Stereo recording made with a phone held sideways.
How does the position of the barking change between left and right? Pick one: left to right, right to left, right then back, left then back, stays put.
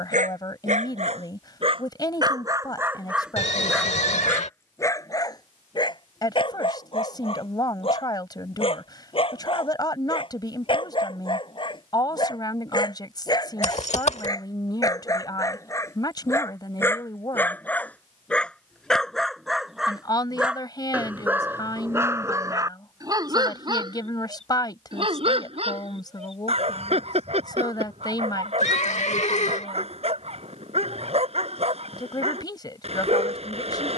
left then back.